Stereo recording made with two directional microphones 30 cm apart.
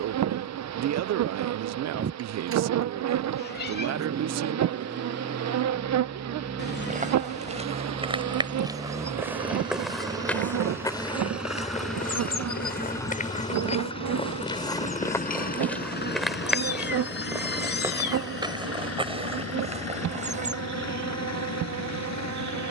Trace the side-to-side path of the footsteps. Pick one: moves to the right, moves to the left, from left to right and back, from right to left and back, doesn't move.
from right to left and back.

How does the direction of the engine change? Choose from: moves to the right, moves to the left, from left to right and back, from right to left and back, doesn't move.
moves to the left.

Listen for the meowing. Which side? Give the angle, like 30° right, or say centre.
30° left.